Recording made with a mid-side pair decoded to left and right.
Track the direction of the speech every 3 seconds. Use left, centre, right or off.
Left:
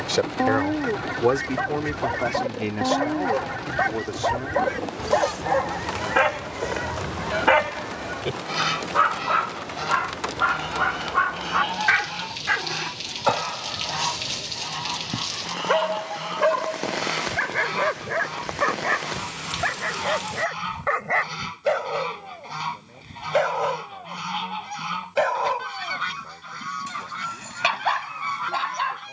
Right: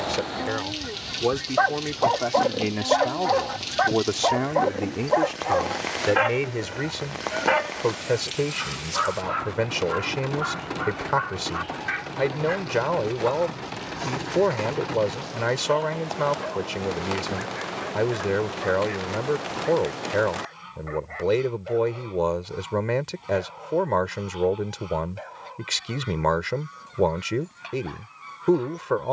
centre, right, right, right, right, right, right, right, right, right.